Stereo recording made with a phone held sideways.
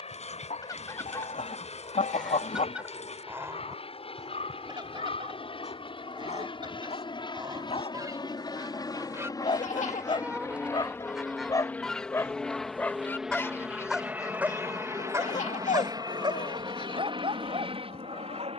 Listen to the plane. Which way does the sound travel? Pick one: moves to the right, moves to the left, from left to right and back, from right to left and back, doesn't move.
moves to the right.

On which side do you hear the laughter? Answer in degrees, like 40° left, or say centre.
70° left.